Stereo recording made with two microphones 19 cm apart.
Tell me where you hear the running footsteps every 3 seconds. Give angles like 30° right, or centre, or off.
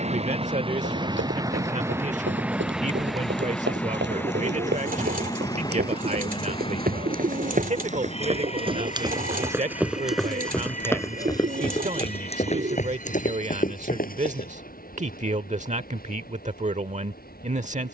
70° right, 70° right, 40° right, centre, 40° left, off.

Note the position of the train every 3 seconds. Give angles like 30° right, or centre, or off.
20° right, 10° left, 30° left, 40° left, 40° left, 50° left.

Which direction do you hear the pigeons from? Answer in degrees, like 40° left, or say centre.
50° right.